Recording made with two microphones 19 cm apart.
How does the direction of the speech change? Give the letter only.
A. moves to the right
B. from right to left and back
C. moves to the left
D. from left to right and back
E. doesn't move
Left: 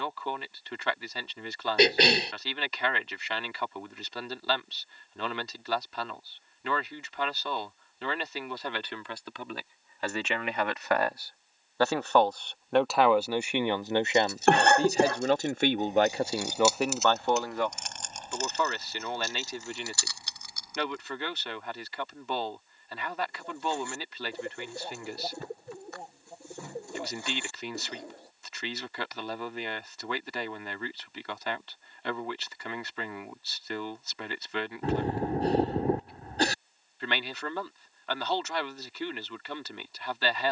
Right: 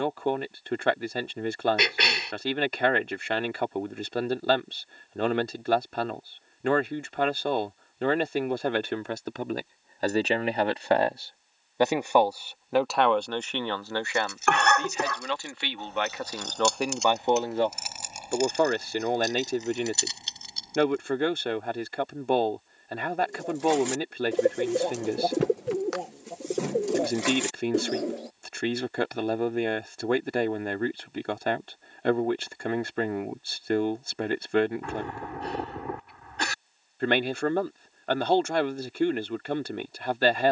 B.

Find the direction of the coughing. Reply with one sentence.
You can hear the coughing on the left.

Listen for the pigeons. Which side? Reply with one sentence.
You can hear the pigeons on the right.